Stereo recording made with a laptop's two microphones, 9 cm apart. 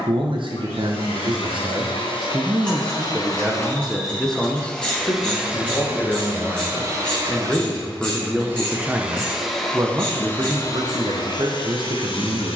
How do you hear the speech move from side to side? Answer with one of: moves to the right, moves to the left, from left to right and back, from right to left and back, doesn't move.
from right to left and back.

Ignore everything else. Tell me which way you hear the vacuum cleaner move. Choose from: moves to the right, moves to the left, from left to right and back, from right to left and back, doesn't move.
from left to right and back.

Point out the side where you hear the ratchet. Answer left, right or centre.
centre.